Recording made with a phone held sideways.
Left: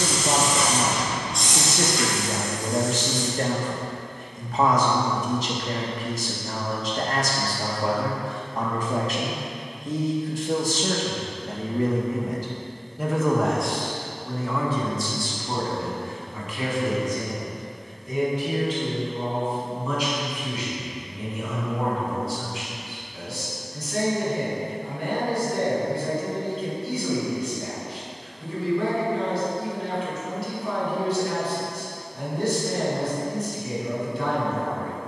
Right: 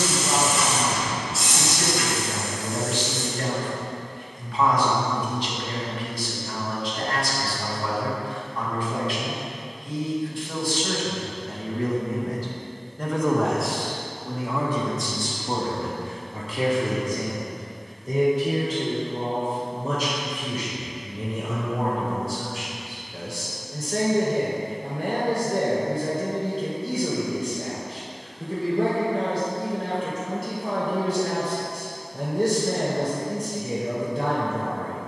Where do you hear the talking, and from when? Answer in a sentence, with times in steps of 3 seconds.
You can hear the talking on the left from 0 s, in the centre from 12 s and on the right from 15 s.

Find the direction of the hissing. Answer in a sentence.
In this clip you hear the hissing in the centre.